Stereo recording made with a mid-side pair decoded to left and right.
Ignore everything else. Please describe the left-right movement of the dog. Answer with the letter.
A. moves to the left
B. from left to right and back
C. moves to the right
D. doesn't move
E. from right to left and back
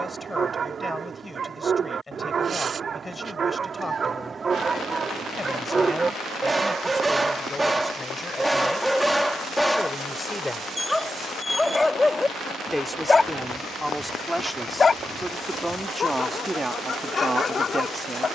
A.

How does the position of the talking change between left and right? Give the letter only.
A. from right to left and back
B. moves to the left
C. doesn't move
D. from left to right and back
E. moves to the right
E.